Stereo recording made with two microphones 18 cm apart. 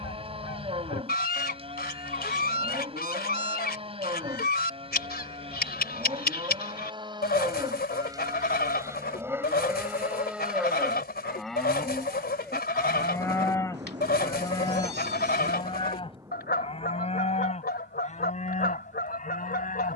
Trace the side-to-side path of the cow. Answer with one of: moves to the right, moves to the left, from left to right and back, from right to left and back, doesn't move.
moves to the left.